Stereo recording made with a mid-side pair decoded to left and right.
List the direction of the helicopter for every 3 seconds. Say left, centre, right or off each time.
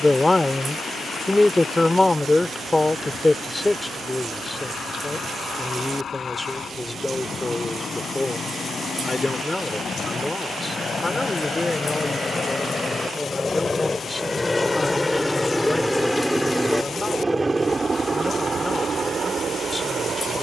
left, left, left, left, left, centre, right.